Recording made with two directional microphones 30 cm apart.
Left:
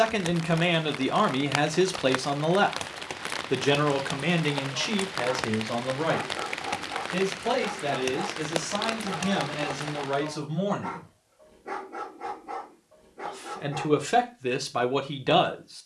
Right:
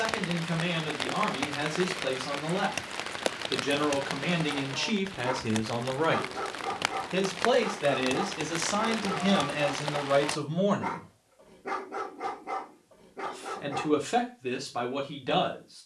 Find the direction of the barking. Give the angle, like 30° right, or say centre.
60° right.